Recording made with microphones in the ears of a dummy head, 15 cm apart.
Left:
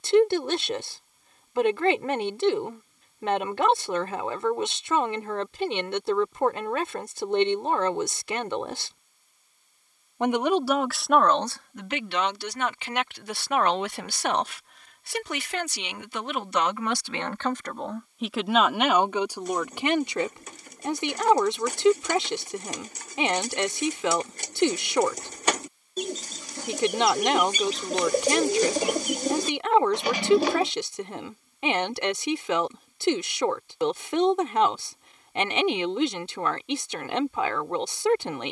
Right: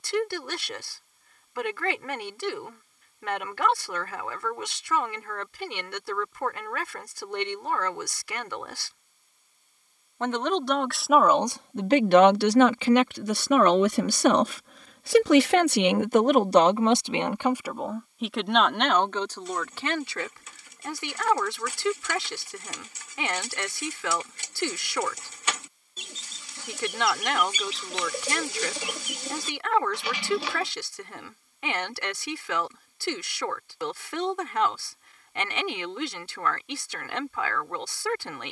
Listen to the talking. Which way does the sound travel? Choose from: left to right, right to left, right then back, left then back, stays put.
right then back.